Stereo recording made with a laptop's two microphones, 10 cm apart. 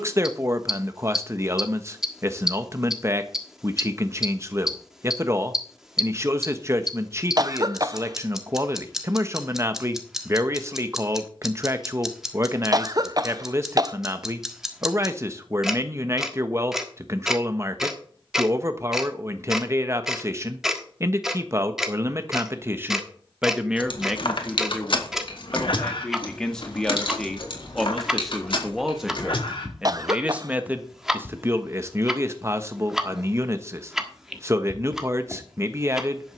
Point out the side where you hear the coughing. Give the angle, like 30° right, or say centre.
40° right.